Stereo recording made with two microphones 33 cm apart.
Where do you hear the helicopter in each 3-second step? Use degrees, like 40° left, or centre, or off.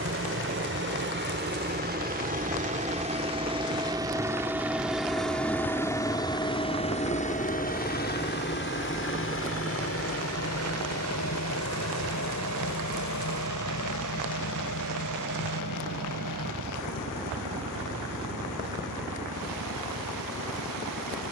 30° right, 10° right, 20° left, 50° left, 60° left, 70° left, 70° left.